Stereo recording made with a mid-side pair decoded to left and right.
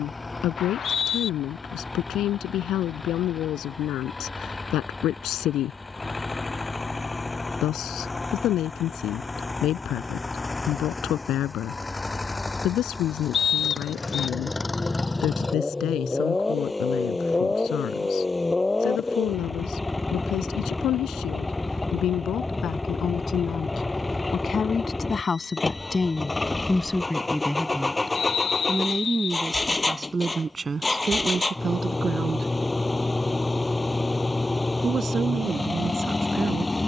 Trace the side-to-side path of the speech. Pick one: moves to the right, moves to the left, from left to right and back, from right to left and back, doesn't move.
moves to the right.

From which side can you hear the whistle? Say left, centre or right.
left.